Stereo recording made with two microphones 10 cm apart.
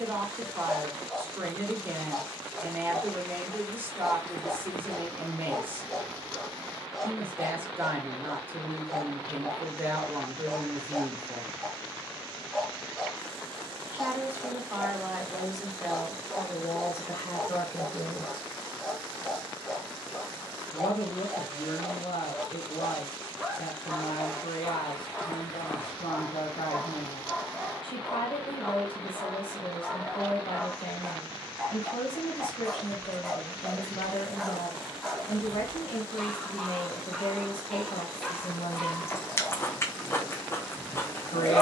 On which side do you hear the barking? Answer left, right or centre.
centre.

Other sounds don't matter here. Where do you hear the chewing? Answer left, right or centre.
left.